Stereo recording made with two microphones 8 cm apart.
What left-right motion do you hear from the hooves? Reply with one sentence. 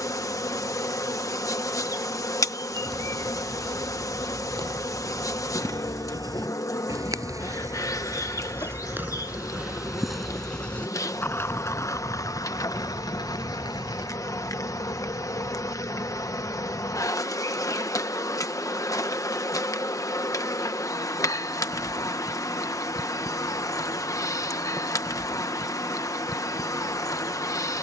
In this clip you hear the hooves go from the right side to the left.